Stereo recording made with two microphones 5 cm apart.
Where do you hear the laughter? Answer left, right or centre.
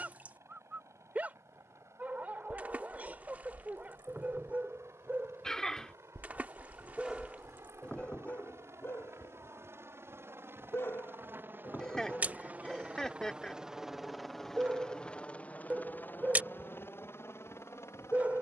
centre.